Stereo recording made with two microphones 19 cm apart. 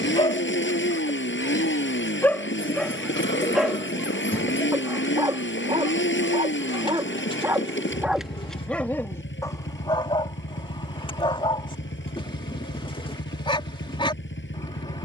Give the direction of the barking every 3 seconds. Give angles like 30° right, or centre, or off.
20° left, 20° right, 10° right, 20° left, 30° left.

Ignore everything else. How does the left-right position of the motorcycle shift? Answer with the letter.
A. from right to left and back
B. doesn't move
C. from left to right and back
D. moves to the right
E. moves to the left
B.